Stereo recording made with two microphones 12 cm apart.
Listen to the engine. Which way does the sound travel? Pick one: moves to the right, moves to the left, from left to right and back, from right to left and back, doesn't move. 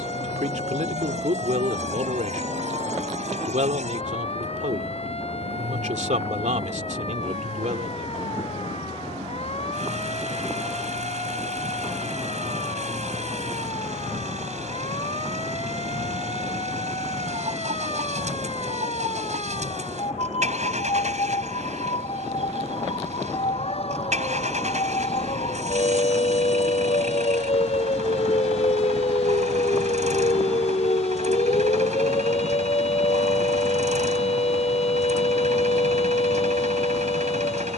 doesn't move.